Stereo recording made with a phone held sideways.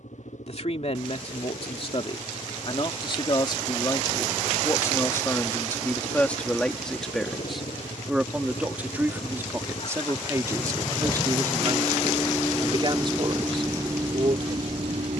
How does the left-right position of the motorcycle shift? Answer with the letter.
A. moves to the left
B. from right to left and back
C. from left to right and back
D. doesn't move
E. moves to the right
E.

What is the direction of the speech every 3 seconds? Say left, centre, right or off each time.
left, left, centre, right, right.